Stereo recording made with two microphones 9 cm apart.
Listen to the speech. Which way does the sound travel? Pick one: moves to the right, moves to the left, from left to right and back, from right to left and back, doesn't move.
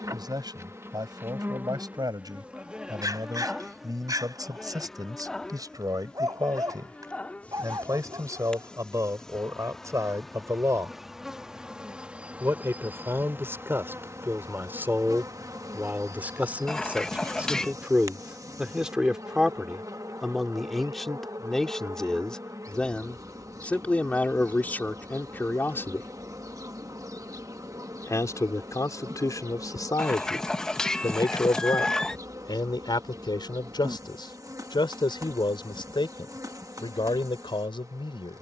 moves to the left.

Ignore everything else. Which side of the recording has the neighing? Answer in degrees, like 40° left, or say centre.
10° left.